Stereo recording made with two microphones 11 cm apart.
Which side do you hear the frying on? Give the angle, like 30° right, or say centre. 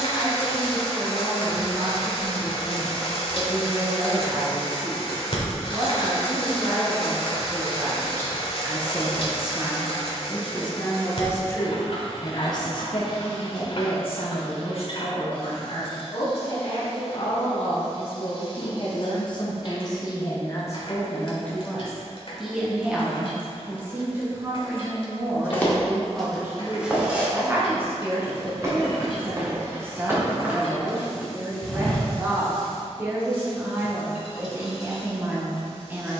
50° left.